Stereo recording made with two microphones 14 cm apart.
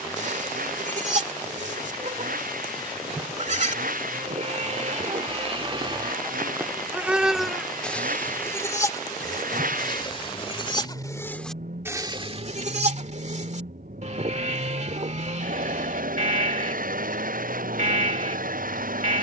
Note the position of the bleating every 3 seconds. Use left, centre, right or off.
right, right, centre, left, right, right, right.